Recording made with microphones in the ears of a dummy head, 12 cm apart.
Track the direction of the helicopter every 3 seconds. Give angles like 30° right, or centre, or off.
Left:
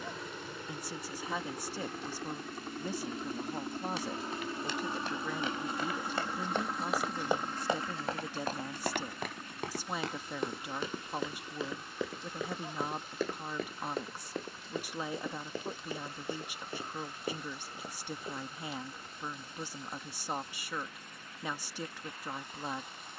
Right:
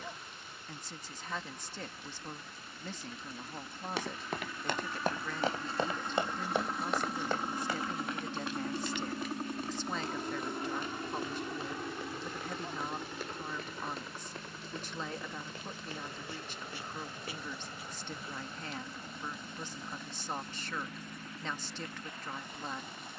50° left, 30° left, 10° right, 40° right, 60° right, 70° right, 70° right, 80° right.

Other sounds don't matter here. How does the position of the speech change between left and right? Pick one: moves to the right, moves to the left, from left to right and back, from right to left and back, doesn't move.
doesn't move.